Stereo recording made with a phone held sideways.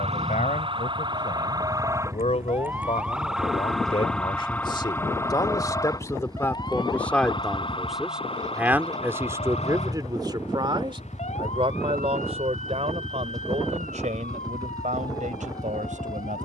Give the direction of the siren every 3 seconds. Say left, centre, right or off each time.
right, centre, left, left, left, left.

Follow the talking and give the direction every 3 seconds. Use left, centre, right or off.
left, left, centre, right, right, right.